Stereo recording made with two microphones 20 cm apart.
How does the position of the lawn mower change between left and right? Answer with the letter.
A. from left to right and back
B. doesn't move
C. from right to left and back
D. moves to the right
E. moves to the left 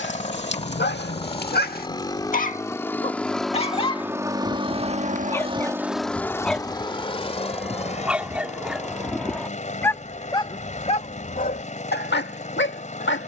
A.